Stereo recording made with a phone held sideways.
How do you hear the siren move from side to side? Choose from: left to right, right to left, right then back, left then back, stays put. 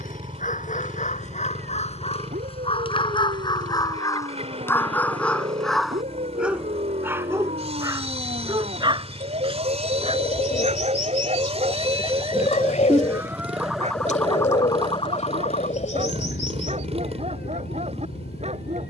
right to left.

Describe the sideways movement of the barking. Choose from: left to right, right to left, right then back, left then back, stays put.
left to right.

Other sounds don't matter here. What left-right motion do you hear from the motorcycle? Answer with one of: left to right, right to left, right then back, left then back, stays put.
stays put.